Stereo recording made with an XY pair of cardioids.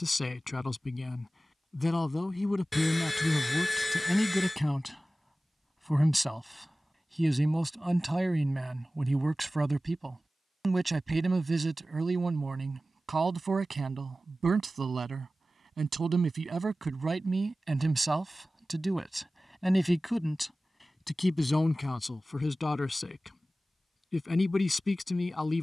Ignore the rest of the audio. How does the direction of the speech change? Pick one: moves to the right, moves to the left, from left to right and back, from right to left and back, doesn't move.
from left to right and back.